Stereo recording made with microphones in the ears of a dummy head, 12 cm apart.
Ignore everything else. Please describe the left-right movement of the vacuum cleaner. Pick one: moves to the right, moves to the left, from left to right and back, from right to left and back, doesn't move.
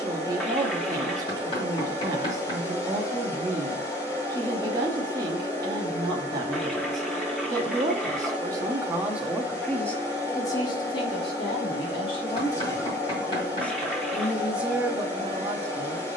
doesn't move.